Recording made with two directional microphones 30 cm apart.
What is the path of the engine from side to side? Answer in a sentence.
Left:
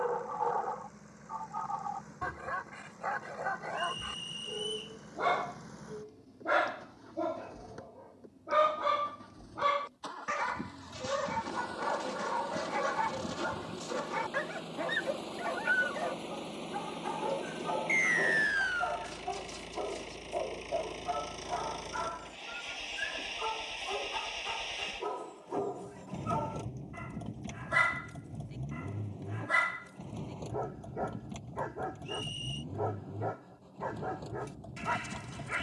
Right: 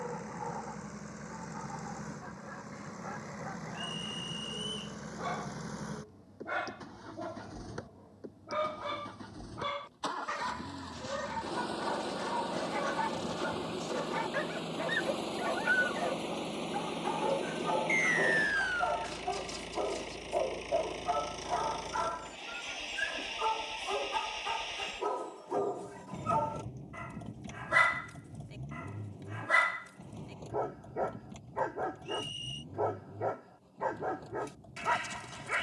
You can hear the engine travel towards the left.